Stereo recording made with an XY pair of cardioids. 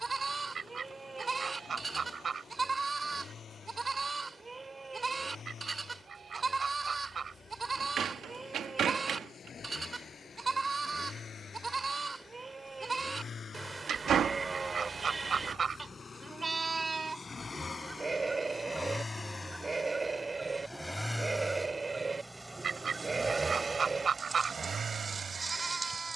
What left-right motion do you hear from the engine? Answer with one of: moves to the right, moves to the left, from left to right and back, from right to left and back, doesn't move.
moves to the right.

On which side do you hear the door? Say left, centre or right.
right.